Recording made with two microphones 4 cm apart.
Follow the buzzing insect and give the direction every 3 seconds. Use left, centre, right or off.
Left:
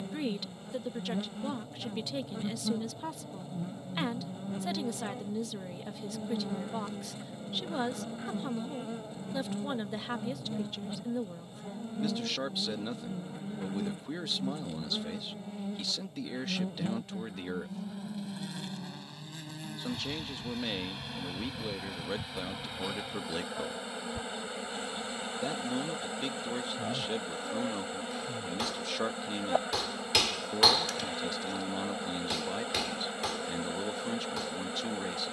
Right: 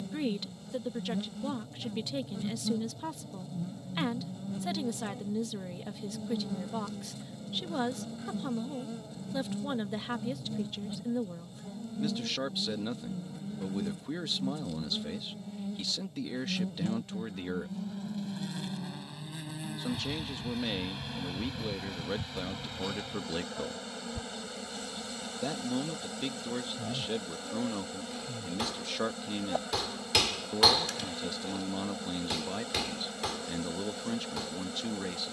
left, left, left, left, left, left, centre, centre, left, left, left, left.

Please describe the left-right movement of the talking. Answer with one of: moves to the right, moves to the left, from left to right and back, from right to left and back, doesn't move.
doesn't move.